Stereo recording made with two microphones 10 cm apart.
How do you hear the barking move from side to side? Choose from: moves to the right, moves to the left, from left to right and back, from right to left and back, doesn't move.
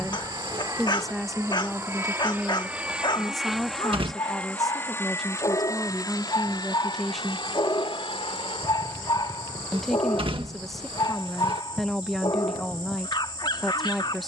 doesn't move.